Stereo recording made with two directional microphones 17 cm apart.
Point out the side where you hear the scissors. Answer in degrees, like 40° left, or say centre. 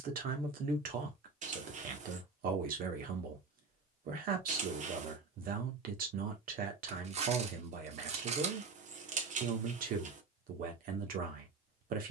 50° right.